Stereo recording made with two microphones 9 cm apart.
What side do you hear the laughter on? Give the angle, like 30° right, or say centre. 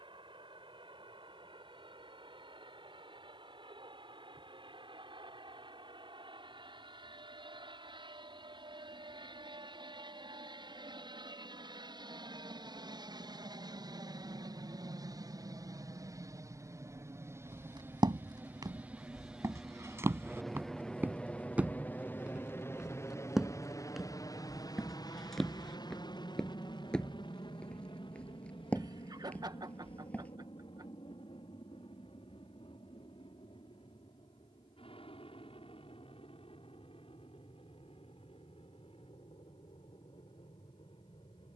50° right.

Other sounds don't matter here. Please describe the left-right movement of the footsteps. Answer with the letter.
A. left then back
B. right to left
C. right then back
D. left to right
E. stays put
B.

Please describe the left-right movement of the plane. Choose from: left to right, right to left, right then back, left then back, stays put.
right to left.